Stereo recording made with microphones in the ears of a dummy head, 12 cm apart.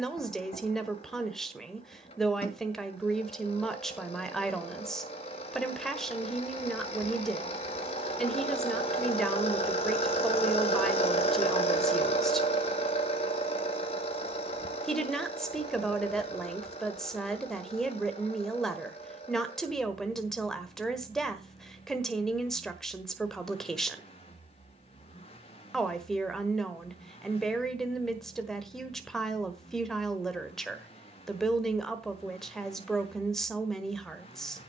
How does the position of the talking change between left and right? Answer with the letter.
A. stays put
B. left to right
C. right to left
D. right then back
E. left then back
A.